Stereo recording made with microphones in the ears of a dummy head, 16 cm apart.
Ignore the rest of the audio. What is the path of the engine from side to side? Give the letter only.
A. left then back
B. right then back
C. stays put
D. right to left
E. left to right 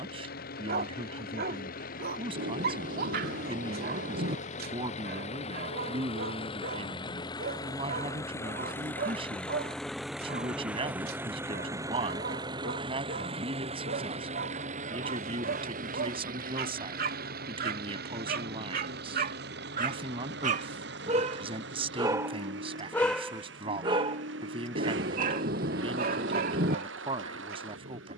E.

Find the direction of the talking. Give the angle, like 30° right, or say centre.
30° right.